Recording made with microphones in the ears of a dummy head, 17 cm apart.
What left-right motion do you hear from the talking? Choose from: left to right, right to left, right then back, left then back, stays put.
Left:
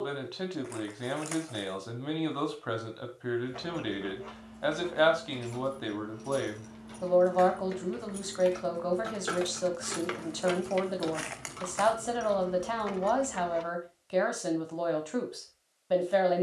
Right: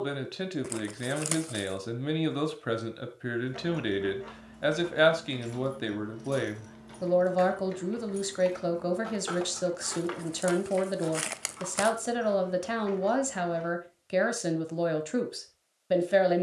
stays put.